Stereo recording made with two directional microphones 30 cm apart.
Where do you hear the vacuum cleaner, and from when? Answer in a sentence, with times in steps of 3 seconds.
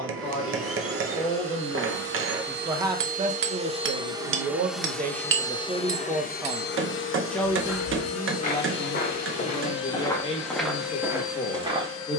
You can hear the vacuum cleaner on the right from 0 s, in the centre from 3 s and on the left from 6 s.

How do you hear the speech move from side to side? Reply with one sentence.
You can hear the speech move from left to right and back again.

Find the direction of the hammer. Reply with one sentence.
In this clip you hear the hammer on the right.